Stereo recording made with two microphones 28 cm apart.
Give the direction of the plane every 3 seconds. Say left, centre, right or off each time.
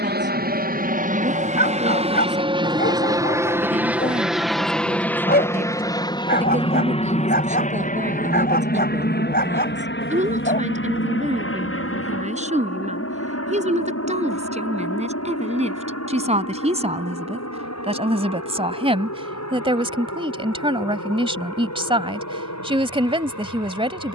right, centre, left, left, left, left, left, left.